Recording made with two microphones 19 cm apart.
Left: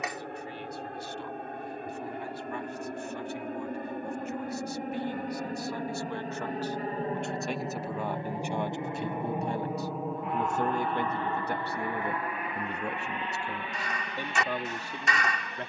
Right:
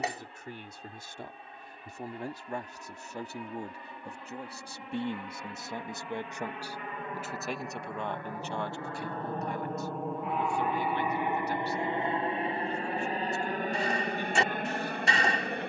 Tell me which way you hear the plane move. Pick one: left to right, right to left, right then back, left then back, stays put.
left to right.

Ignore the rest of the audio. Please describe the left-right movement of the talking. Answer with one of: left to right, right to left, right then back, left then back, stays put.
right to left.